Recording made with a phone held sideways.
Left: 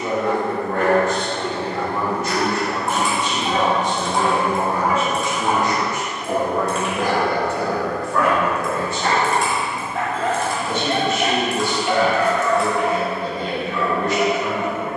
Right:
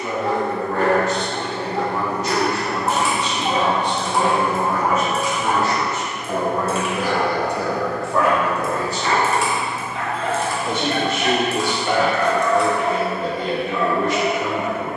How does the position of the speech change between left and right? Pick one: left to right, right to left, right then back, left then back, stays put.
left to right.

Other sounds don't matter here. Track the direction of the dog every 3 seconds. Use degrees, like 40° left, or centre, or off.
40° right, 10° right, 50° left, 40° left, 10° right.